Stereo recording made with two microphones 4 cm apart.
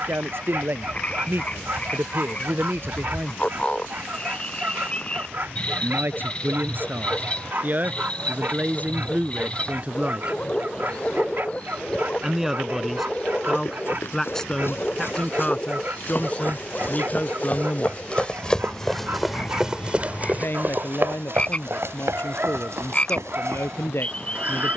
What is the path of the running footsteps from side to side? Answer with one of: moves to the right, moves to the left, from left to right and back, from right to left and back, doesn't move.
moves to the right.